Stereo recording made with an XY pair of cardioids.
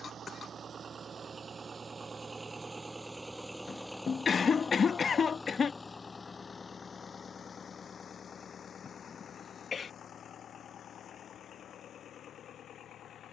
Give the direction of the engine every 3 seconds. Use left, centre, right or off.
right, centre, left, left, left.